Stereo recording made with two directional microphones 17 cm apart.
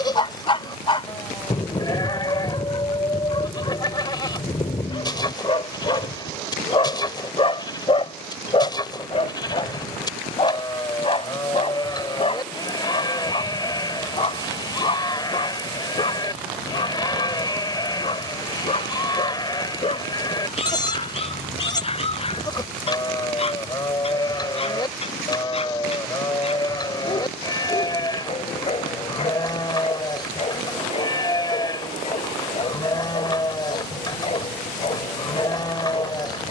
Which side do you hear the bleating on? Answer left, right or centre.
left.